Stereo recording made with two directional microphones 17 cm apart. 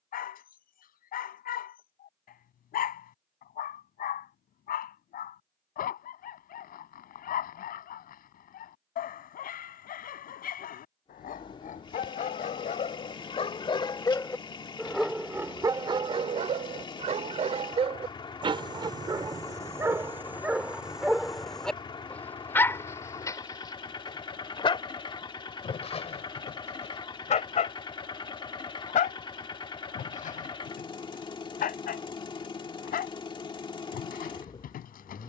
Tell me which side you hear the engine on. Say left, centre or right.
left.